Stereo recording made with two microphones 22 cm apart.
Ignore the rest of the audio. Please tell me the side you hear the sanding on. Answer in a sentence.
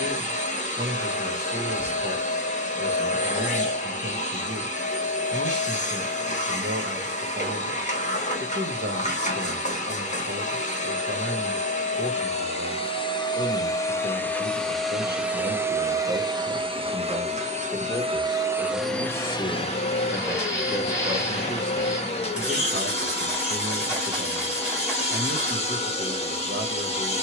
In this clip you hear the sanding in the centre.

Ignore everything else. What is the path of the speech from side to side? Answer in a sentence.
You can hear the speech move from right to left and back again.